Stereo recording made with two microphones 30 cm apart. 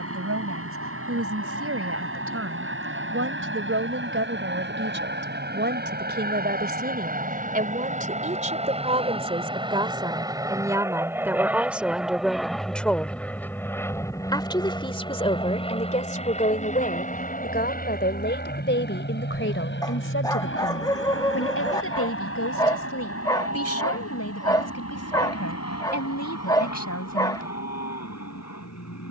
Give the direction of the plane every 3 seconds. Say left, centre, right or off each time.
right, right, right, centre, centre, left, left, left, left, left.